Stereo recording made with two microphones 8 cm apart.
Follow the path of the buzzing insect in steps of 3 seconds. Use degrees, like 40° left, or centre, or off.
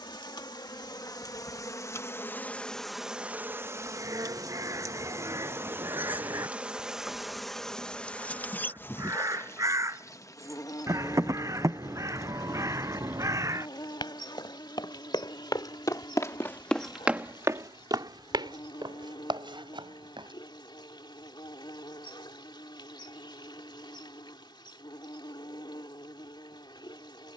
40° left, 30° right, centre, 40° left, 60° left, 70° left, 70° left, 70° left, 70° left.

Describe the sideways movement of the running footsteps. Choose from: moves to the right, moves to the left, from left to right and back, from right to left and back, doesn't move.
moves to the right.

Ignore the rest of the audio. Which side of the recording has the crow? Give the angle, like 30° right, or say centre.
40° right.